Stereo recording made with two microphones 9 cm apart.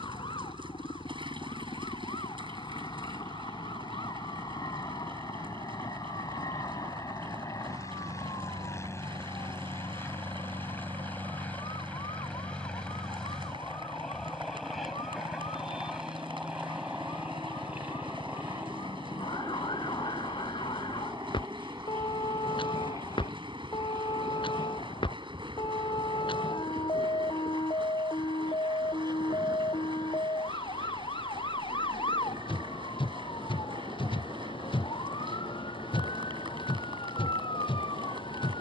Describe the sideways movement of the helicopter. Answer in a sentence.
You can hear the helicopter move from left to right.